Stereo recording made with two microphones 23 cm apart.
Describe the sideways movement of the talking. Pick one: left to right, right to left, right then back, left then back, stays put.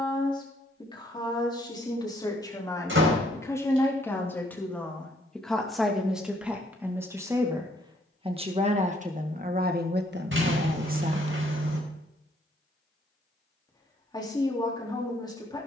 right then back.